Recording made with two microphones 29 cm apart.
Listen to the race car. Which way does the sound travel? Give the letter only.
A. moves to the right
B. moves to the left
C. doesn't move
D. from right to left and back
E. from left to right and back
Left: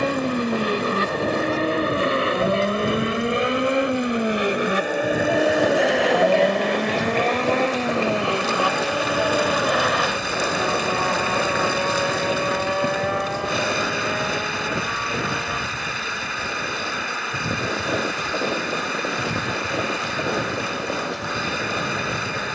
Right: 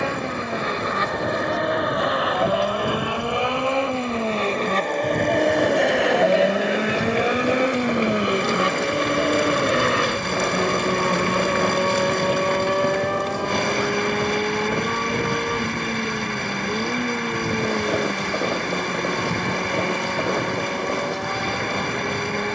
A.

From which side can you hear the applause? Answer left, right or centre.
centre.